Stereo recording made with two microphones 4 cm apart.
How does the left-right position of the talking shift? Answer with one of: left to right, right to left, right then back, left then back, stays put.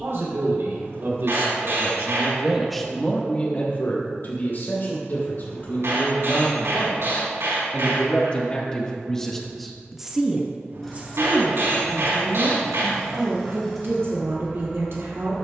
left then back.